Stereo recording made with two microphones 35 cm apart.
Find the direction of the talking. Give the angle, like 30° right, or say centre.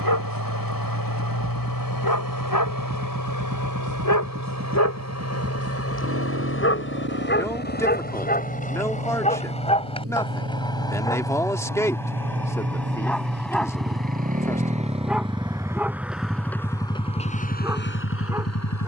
10° left.